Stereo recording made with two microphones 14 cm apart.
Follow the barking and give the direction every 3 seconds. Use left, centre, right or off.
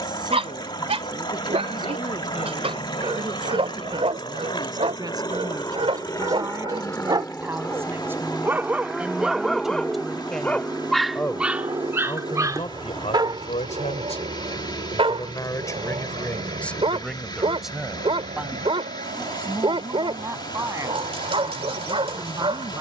right, right, right, centre, right, right, right, right.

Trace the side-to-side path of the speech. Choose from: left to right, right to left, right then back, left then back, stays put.
left then back.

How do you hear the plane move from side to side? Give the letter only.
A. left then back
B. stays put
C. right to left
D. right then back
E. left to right
E.